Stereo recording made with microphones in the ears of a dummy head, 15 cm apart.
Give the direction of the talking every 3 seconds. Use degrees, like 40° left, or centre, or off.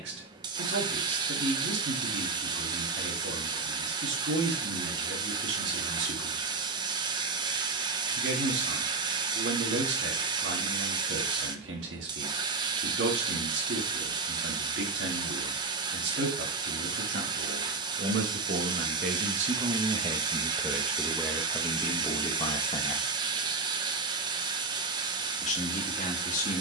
80° right, 80° right, 80° right, 80° right, 80° right, 70° right, 40° right, 20° left, 40° left.